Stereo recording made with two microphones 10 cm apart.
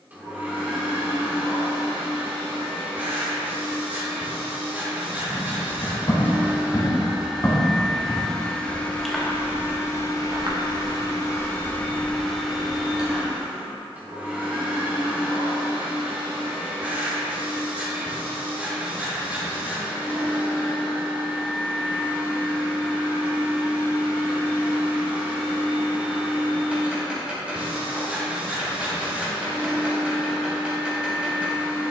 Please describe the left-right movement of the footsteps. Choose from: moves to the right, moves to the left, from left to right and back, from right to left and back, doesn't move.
moves to the right.